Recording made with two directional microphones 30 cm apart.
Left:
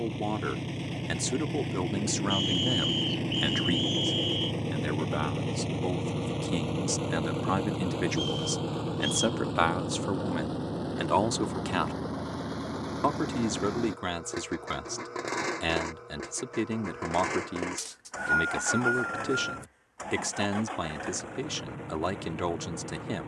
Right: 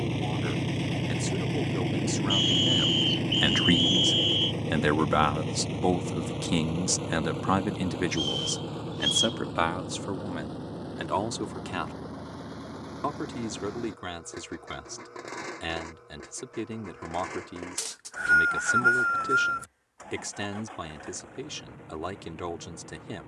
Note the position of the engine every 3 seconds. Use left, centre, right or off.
right, centre, left, left, left, left, left, left.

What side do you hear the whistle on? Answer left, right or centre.
right.